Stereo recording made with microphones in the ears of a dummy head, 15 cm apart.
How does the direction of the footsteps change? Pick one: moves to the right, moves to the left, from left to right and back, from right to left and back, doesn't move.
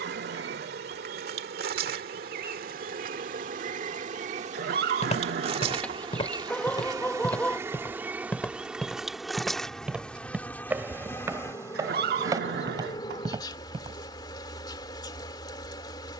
moves to the right.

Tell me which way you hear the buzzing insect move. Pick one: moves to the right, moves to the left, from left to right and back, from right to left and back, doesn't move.
moves to the left.